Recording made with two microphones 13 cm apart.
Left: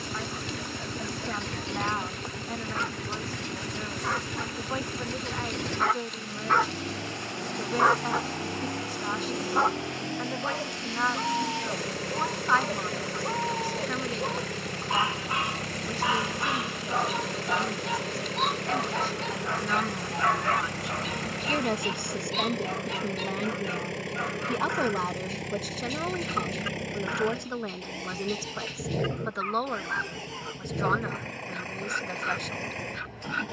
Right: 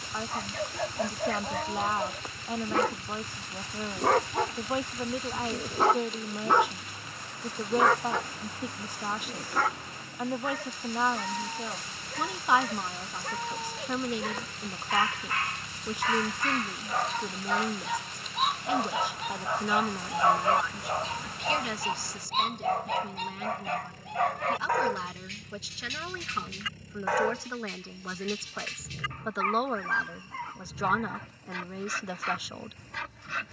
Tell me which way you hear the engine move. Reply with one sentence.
In this clip you hear the engine stay in one place.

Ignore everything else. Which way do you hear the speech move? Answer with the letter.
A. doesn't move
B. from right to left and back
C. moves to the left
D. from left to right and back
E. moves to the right
B.